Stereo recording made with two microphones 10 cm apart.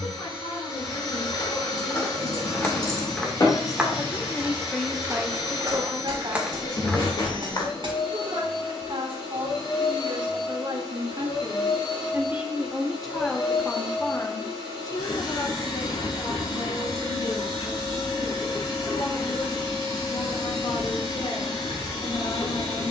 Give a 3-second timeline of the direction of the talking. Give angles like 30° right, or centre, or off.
60° left, centre, 60° right, 50° right, 10° left, 50° left, 60° left, 60° left.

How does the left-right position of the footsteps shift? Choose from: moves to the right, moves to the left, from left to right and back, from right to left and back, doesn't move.
from left to right and back.